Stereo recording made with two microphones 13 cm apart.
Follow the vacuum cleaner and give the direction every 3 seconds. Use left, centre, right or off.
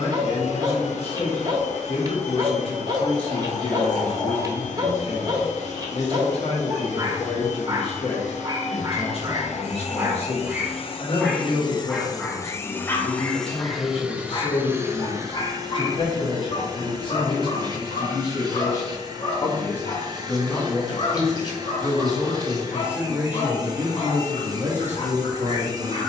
left, left, left, left, centre, right, right, right, right.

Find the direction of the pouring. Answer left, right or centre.
left.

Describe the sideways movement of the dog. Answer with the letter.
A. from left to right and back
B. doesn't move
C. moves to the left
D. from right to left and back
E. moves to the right
C.